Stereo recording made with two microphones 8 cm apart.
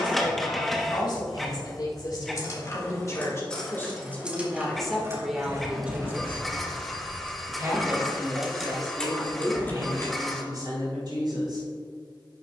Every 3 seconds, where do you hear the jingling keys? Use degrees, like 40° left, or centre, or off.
40° left, 10° right, 20° right, 30° left.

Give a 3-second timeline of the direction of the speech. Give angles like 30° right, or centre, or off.
60° left, 10° left, 40° right, 50° right.